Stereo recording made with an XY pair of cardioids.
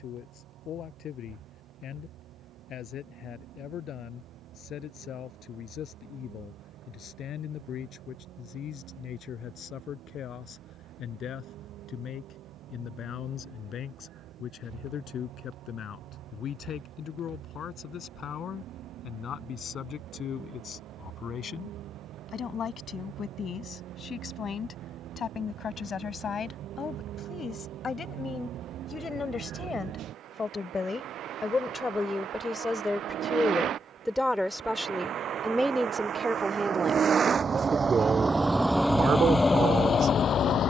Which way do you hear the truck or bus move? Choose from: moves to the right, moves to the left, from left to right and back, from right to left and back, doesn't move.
moves to the left.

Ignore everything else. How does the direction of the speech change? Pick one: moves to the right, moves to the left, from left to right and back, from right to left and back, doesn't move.
moves to the right.